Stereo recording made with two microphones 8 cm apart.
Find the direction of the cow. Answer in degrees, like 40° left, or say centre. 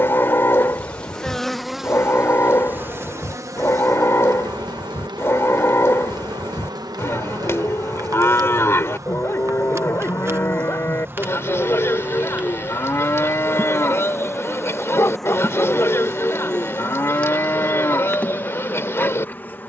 30° left.